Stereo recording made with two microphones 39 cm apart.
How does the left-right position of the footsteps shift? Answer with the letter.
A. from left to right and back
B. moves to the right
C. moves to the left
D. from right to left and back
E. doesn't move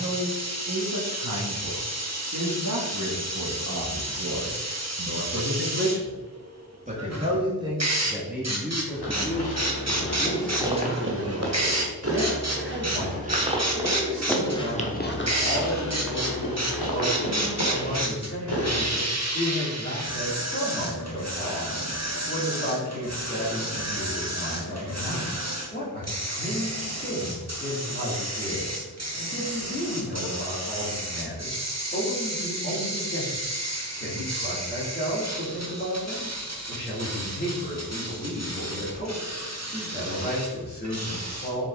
A.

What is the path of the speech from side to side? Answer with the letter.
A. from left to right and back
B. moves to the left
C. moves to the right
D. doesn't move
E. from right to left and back
B.